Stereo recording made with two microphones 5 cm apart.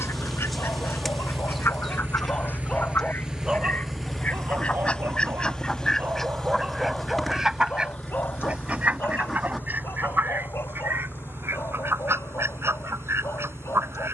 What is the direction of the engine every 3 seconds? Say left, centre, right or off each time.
right, centre, left, left, left.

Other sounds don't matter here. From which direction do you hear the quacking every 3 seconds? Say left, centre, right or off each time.
left, left, centre, right, right.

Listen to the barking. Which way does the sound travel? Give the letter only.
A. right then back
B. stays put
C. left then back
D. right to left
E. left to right
A.